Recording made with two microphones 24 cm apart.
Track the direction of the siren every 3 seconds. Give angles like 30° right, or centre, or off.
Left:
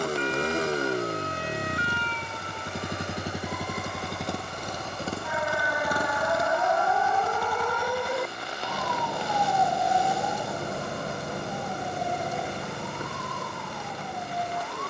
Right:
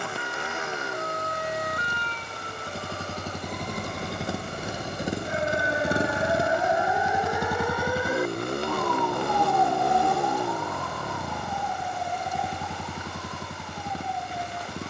50° right, 30° right, 10° right, 30° left, 50° left.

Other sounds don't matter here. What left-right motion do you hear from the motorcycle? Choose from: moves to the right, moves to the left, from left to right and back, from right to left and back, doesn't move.
moves to the right.